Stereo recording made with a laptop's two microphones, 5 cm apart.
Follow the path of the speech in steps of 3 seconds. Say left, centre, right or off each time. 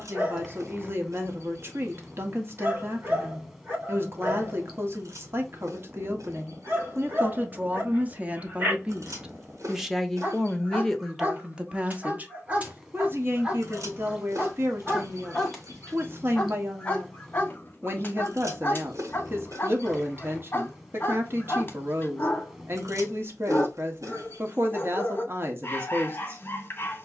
right, right, right, centre, right, right, right, right, right.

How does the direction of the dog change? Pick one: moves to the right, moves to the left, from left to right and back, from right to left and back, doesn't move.
moves to the left.